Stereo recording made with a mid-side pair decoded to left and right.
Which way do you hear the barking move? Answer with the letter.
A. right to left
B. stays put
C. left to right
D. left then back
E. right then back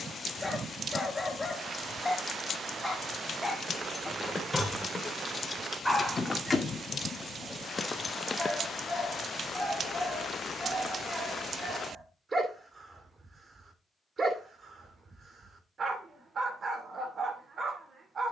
C.